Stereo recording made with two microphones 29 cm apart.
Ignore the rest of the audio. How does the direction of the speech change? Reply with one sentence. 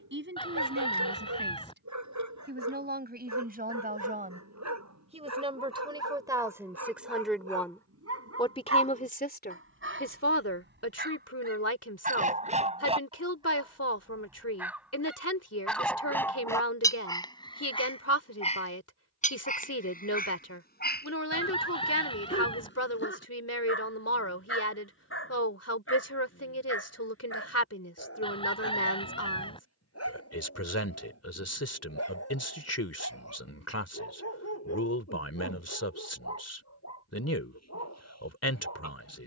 You can hear the speech move from right to left.